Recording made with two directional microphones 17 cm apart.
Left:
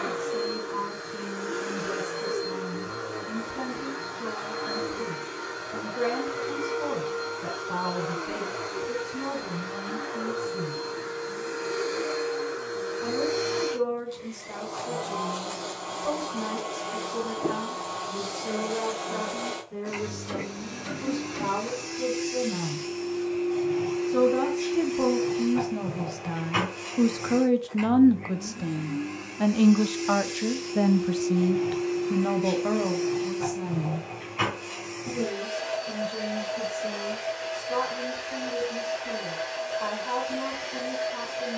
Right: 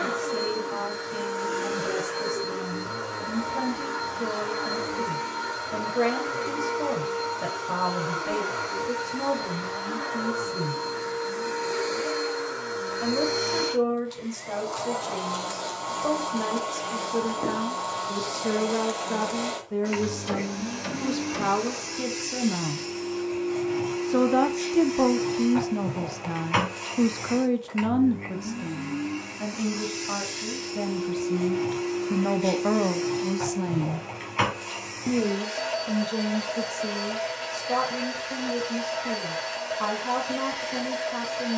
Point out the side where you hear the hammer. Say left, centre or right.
right.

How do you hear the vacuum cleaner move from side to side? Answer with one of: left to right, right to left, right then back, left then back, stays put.
stays put.